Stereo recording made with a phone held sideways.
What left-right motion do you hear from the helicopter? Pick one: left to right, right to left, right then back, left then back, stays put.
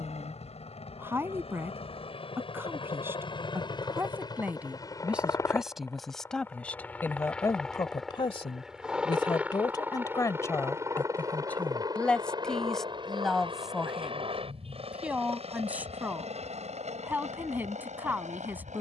left to right.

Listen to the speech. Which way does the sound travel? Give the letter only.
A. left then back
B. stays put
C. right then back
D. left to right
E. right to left
A.